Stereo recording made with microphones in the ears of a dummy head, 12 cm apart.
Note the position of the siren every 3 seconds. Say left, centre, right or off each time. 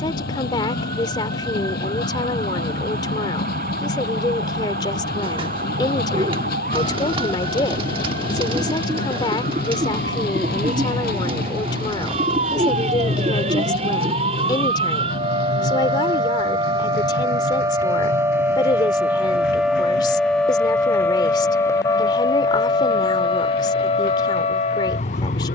right, right, right, right, right, right, centre, left, left.